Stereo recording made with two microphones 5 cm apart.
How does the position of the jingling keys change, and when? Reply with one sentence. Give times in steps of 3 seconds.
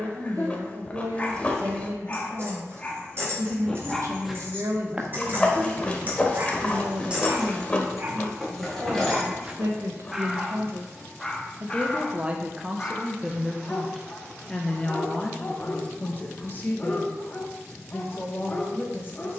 In this clip you hear the jingling keys on the right from 0 s, in the centre from 6 s and not at all from 12 s.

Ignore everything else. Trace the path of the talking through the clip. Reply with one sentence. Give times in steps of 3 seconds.
You can hear the talking on the right from 0 s, in the centre from 12 s and on the left from 15 s.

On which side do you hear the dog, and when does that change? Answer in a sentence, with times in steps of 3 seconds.
In this clip you hear the dog on the left from 0 s, in the centre from 3 s, on the right from 6 s, in the centre from 9 s and on the left from 12 s.